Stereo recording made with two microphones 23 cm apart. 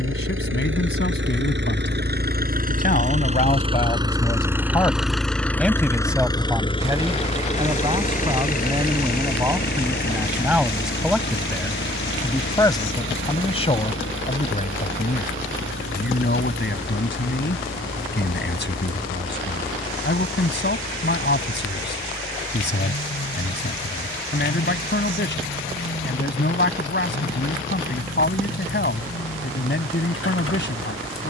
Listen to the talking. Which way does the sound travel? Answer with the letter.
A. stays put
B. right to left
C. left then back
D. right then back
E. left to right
D.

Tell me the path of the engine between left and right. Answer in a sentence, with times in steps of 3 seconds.
You can hear the engine on the right from 0 s, in the centre from 3 s and on the left from 6 s.